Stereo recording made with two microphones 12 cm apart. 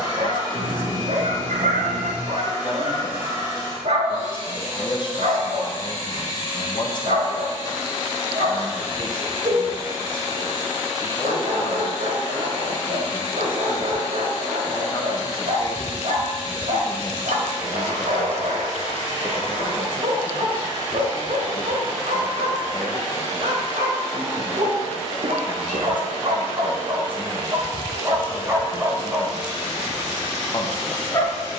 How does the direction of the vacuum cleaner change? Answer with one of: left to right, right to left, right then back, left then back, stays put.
stays put.